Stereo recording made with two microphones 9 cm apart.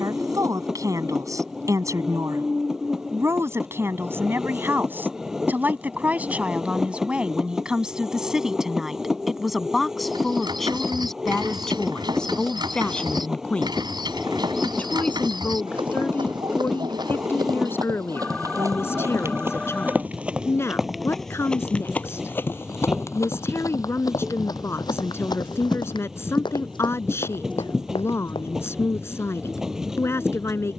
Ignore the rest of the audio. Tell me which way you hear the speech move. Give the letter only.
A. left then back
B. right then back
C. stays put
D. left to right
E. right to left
E.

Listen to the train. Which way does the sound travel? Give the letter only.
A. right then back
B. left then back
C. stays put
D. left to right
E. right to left
C.